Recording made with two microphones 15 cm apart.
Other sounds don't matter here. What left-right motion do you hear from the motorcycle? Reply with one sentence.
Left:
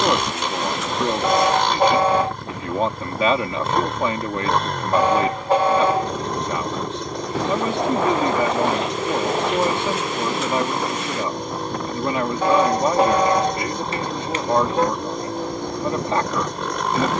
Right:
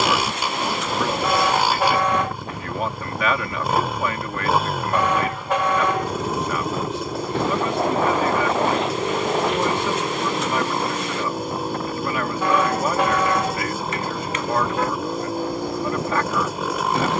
You can hear the motorcycle stay put.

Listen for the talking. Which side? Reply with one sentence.
You can hear the talking on the left.